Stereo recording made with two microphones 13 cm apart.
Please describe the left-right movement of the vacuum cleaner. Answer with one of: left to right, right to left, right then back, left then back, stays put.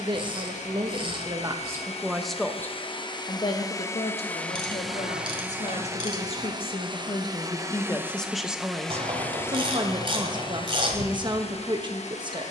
right then back.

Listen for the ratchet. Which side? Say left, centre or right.
right.